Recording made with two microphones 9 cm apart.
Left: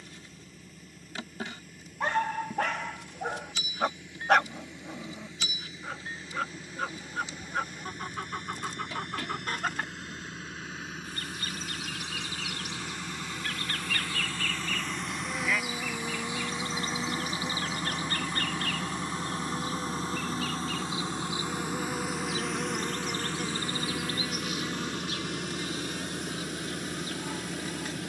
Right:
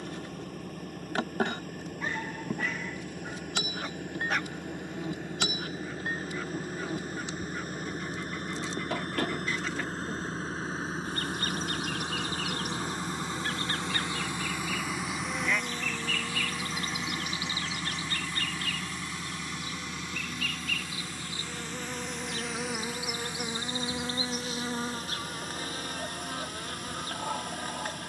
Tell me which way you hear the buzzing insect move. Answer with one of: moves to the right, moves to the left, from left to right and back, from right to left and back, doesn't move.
from right to left and back.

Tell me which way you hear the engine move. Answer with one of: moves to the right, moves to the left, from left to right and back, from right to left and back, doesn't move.
moves to the left.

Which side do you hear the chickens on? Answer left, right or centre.
left.